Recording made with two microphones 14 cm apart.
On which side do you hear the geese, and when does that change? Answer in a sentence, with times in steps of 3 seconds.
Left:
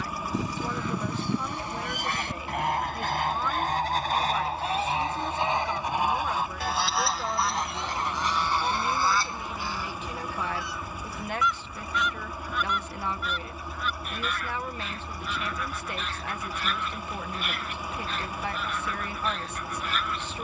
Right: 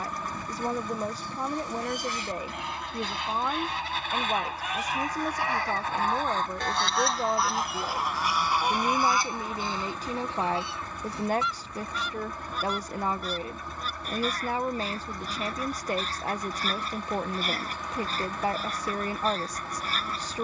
In this clip you hear the geese on the left from 0 s, in the centre from 6 s and on the right from 9 s.